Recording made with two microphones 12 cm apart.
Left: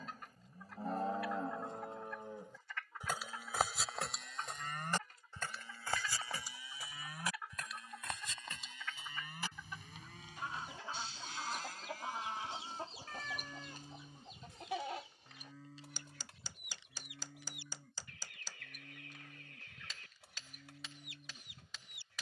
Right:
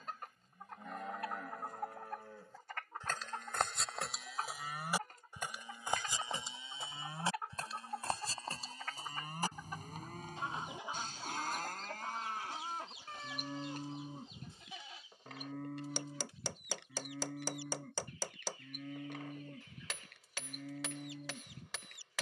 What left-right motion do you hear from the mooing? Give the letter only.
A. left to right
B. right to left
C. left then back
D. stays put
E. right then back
A.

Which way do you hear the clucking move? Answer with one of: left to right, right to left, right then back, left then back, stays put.
right to left.